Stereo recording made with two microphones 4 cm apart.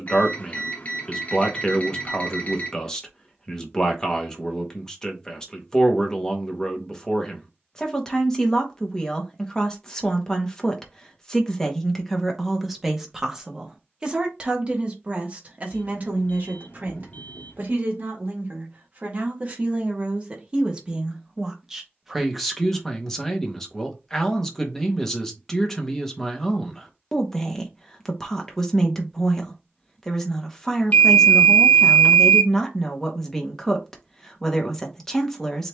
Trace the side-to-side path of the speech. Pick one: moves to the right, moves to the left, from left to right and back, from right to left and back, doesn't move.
from left to right and back.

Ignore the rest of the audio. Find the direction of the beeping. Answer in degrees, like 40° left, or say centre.
40° left.